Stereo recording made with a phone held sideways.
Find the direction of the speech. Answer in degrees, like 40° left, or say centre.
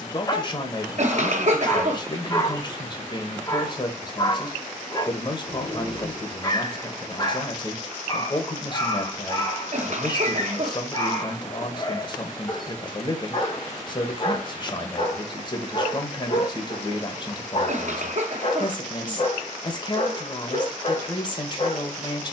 30° left.